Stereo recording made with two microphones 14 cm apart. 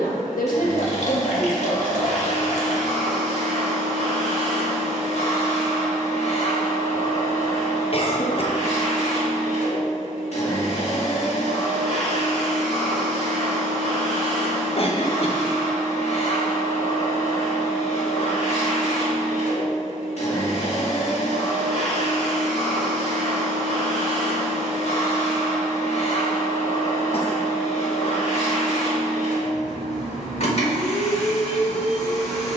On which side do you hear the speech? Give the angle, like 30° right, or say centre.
80° left.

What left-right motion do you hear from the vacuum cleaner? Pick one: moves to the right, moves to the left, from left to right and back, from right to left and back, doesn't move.
doesn't move.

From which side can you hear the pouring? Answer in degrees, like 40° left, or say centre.
60° left.